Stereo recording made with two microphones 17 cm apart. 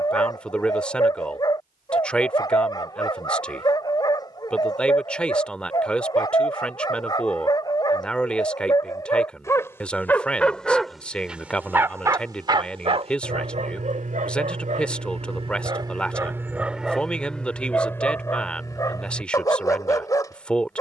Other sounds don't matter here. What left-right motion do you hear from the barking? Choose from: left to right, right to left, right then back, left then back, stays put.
right then back.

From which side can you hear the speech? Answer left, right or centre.
centre.